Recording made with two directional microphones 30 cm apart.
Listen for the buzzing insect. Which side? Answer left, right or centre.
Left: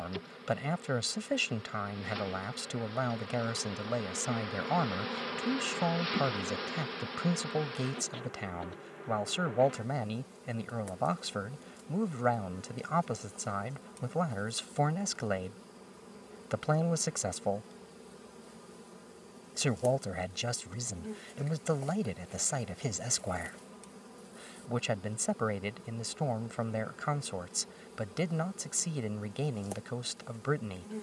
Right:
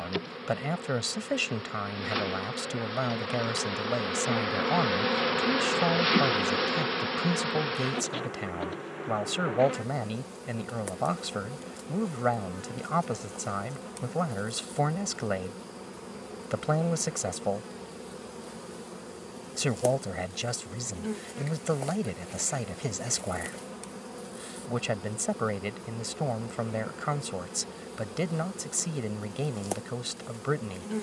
right.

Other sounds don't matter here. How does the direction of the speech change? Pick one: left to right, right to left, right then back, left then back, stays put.
stays put.